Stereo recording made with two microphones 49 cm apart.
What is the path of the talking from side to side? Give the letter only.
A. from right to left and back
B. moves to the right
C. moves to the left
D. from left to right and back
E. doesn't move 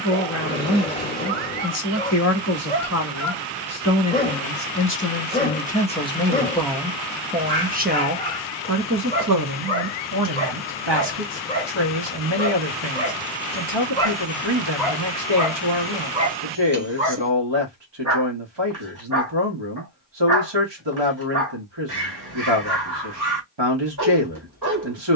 B.